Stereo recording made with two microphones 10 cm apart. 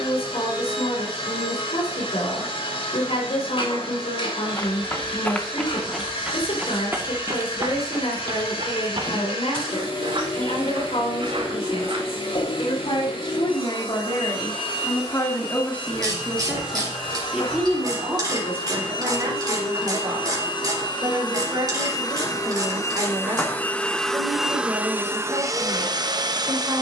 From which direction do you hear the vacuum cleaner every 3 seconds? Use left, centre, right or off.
left, left, left, left, left, left, left, left, right.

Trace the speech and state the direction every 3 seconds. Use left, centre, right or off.
left, left, left, left, left, centre, right, right, right.